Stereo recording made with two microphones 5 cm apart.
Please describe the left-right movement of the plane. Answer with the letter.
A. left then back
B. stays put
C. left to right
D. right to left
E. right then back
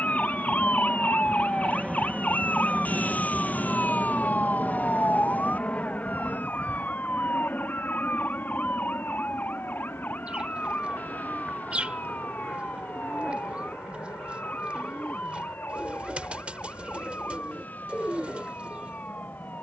D.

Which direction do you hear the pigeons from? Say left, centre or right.
right.